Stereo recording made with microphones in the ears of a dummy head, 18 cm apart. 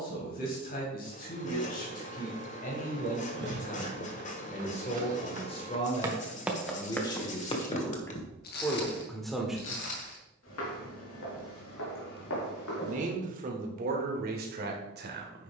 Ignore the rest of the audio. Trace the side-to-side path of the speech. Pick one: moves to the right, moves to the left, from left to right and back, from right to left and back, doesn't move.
moves to the right.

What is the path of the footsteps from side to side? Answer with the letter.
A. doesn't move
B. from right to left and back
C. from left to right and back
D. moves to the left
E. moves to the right
D.